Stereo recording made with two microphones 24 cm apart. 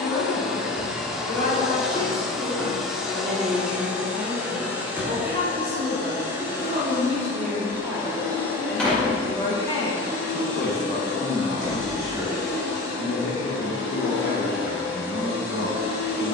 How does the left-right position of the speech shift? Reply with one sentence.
You can hear the speech move from left to right and back again.